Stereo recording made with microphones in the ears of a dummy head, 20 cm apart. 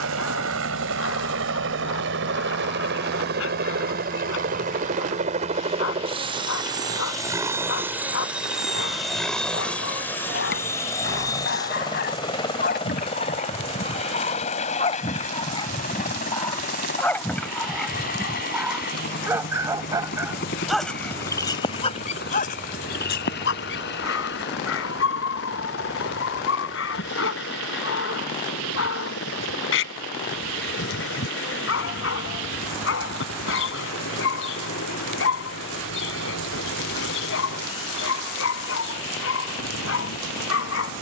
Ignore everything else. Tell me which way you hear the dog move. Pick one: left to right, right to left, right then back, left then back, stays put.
right then back.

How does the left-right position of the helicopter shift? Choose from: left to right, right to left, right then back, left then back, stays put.
right to left.